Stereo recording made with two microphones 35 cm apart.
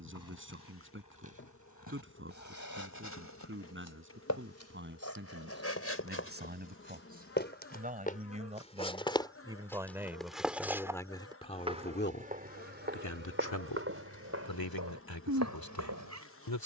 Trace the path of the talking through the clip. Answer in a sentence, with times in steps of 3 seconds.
In this clip you hear the talking on the right from 0 s, in the centre from 9 s and on the left from 12 s.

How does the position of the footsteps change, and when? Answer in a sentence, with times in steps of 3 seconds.
In this clip you hear the footsteps on the left from 0 s, in the centre from 9 s and on the right from 12 s.